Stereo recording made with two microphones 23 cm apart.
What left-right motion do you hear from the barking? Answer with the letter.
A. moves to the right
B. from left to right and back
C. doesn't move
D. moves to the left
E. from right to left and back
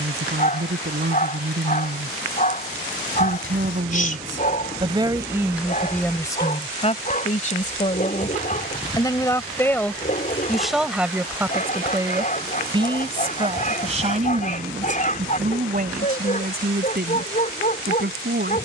C.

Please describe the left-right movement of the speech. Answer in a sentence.
You can hear the speech go left and come back.